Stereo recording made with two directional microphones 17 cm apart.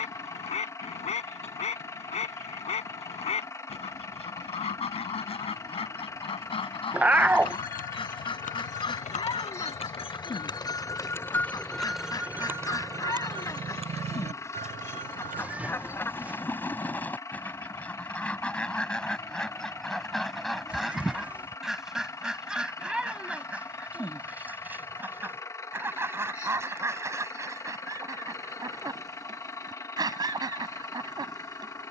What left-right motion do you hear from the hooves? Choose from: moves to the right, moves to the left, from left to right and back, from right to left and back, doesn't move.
moves to the right.